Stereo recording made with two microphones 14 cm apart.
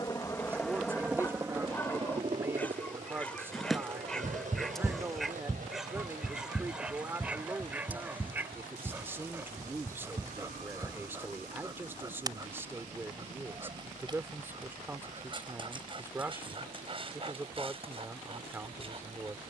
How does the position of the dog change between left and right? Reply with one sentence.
In this clip you hear the dog travel towards the right.